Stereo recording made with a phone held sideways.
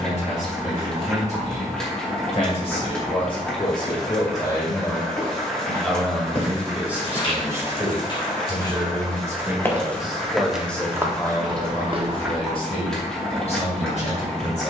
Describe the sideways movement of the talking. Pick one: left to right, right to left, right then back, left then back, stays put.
right then back.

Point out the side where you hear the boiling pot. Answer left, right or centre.
centre.